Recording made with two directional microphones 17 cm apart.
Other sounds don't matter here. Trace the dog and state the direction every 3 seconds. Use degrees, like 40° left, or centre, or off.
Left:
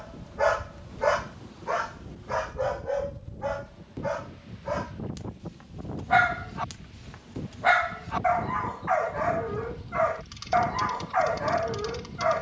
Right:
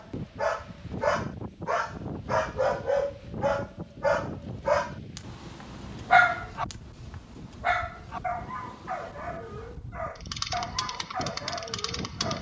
centre, 30° right, 20° left, 50° left.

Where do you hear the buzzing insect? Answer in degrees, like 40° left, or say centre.
50° right.